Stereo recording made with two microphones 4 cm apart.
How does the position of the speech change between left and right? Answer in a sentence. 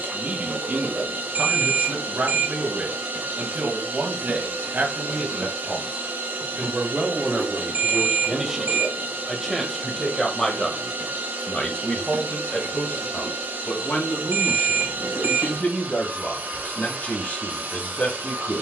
You can hear the speech move to the left.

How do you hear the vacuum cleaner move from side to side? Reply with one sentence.
You can hear the vacuum cleaner stay in one place.